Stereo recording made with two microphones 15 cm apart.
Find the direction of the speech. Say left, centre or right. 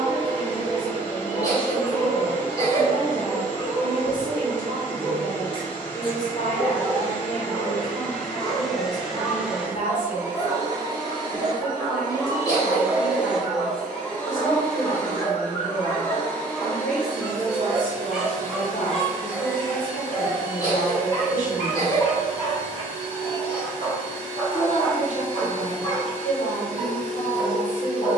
left.